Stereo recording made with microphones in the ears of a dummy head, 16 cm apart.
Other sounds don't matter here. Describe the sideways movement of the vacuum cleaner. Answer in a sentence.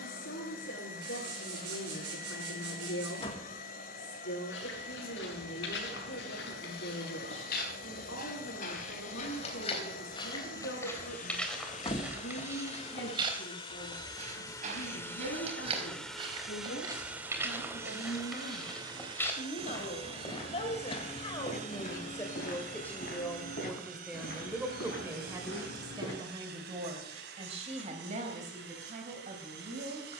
You can hear the vacuum cleaner move to the right.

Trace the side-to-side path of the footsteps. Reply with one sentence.
You can hear the footsteps move from left to right and back again.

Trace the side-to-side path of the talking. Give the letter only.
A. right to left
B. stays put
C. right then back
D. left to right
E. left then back
D.